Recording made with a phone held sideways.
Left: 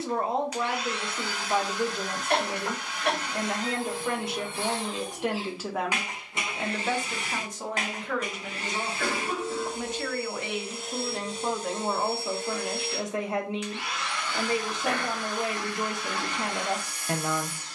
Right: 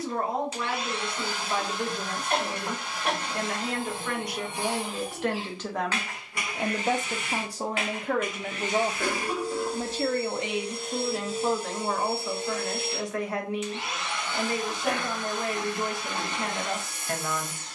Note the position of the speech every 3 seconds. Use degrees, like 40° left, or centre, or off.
30° left, 20° left, 30° right, 10° right, 20° left, 20° left.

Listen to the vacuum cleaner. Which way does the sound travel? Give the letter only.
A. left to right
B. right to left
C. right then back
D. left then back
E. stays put
D.